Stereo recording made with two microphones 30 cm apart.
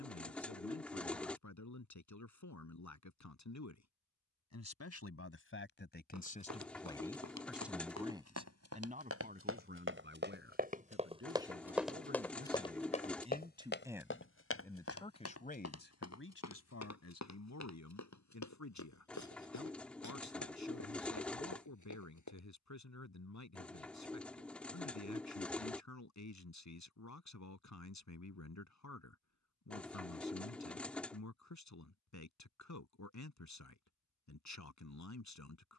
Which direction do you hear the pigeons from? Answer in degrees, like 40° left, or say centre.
centre.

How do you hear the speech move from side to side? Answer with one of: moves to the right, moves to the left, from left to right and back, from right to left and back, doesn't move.
from left to right and back.